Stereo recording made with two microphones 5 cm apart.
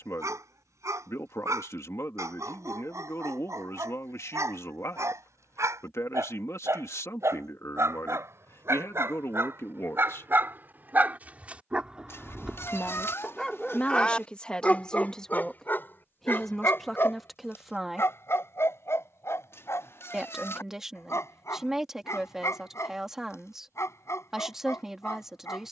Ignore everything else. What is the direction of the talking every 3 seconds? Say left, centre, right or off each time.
left, left, left, left, left, centre, centre, centre, centre.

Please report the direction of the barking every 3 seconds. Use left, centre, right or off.
right, right, right, right, centre, left, left, left, left.